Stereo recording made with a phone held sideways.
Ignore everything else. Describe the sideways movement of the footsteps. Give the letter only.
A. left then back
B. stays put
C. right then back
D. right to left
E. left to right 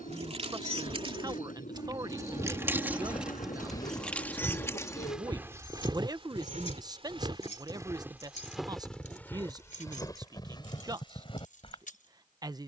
C.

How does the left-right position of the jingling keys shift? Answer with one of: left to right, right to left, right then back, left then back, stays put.
right to left.